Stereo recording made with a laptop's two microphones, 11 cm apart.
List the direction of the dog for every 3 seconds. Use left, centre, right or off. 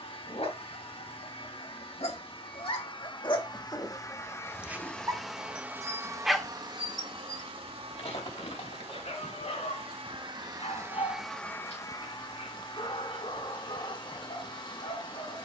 left, centre, left, left, left.